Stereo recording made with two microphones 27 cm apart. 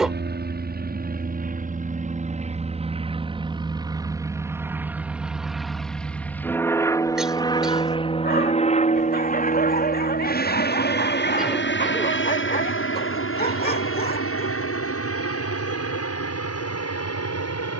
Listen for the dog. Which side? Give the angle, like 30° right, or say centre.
30° left.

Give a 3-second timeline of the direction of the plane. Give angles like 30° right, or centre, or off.
30° right, 10° right, 10° left, 30° left, 50° left, 60° left.